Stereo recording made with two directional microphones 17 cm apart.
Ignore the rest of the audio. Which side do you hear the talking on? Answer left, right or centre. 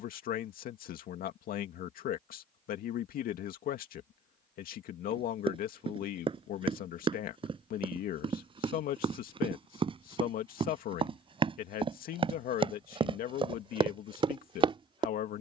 left.